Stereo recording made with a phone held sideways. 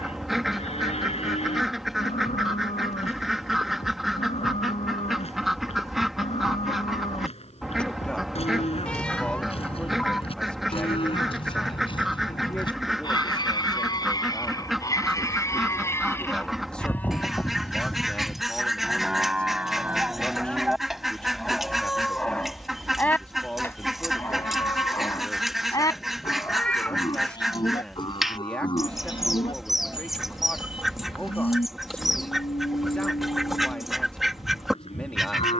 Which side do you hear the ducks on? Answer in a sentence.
In this clip you hear the ducks in the centre.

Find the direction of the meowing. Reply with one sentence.
In this clip you hear the meowing in the centre.